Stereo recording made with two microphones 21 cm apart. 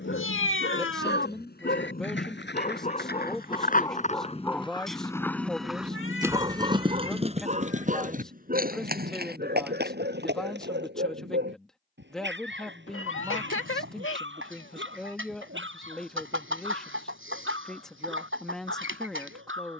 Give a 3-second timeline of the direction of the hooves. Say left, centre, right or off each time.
left, left, right, right, off, off, off.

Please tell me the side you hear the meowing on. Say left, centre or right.
left.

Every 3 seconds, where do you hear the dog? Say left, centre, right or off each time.
left, centre, right, right, right, right, right.